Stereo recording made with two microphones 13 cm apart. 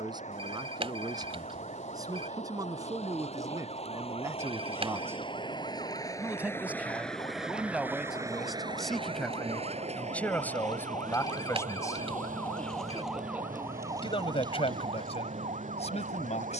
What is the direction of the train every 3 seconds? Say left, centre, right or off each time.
left, left, centre, right, right, right.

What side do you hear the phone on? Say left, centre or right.
right.